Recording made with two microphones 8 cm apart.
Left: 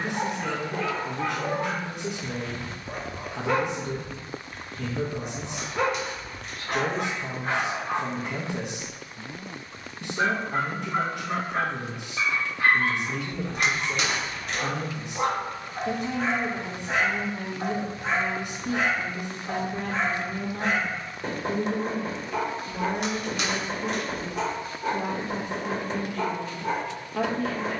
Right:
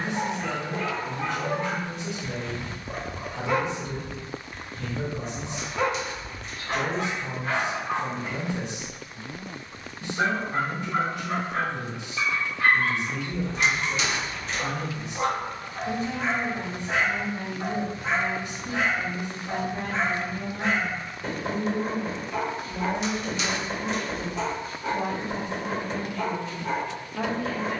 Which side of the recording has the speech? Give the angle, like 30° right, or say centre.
70° left.